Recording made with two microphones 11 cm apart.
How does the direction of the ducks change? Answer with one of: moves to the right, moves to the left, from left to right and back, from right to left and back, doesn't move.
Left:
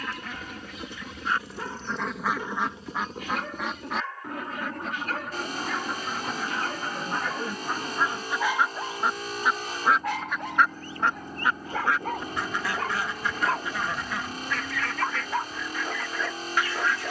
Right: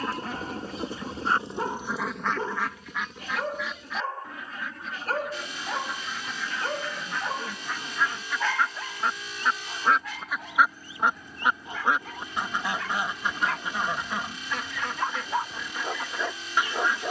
from right to left and back.